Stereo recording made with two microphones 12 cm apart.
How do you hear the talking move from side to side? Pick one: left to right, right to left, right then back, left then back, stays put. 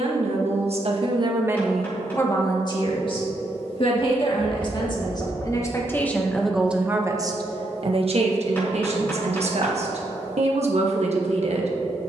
left then back.